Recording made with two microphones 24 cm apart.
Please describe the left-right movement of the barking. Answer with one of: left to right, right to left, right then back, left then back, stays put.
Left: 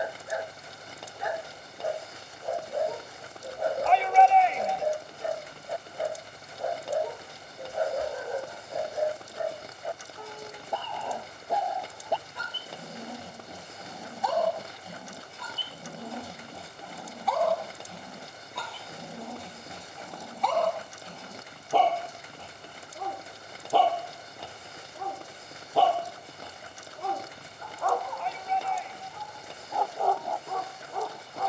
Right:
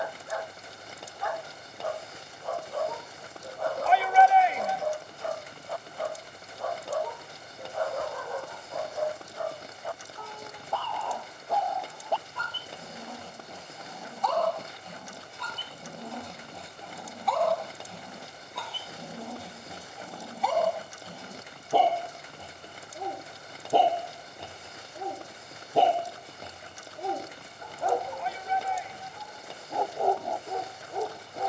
left to right.